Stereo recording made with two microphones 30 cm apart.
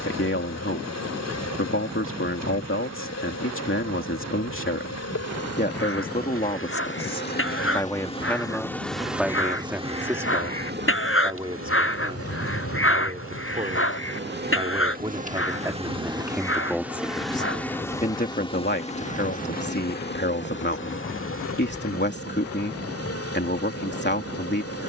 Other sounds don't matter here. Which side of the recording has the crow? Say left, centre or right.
left.